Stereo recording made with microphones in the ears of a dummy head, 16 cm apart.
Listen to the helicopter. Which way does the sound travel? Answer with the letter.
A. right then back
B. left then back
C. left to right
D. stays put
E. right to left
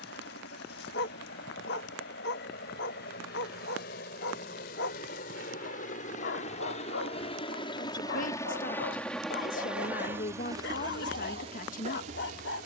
C.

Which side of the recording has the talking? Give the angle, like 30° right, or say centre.
50° left.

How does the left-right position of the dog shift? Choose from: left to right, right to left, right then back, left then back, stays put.
stays put.